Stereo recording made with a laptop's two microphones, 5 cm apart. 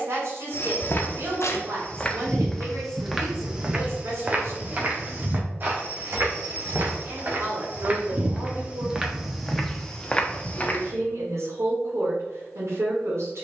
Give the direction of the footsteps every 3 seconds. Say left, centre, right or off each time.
left, right, right, centre, off.